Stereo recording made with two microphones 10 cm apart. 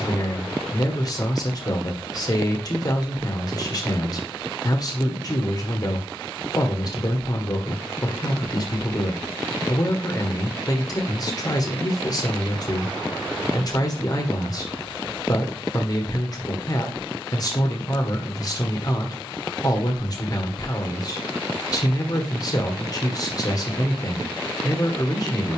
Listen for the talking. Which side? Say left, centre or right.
left.